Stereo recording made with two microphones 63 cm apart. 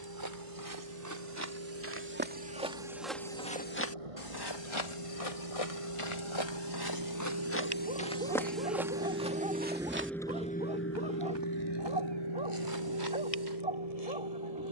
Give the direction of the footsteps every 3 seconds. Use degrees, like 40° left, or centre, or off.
20° right, 40° left, 20° left, 20° right, 30° right.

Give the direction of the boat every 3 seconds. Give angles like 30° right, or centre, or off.
60° right, 60° right, 40° right, 10° left, 60° left.